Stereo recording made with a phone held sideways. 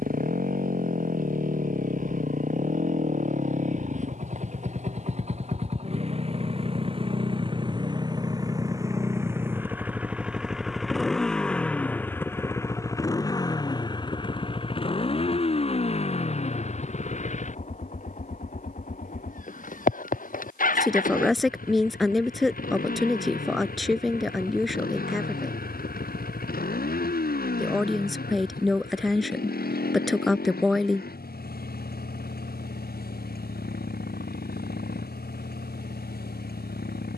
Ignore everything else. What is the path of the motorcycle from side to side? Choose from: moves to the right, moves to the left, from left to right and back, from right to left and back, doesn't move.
moves to the left.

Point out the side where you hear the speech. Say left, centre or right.
centre.